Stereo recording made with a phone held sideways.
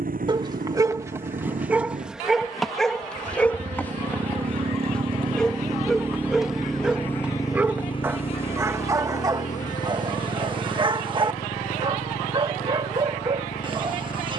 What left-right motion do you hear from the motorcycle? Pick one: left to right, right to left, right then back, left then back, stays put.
right to left.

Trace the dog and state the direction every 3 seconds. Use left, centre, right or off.
centre, centre, centre, right, right.